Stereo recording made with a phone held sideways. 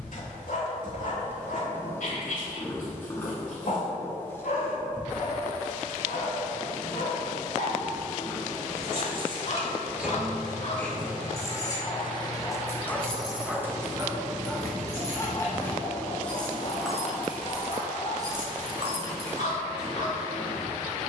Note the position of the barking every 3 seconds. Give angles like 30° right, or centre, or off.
70° left, 70° left, 60° left, 50° left, centre, 40° left, 60° left.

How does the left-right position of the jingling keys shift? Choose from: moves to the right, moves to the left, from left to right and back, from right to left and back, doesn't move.
from right to left and back.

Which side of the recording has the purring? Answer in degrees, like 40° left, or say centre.
20° left.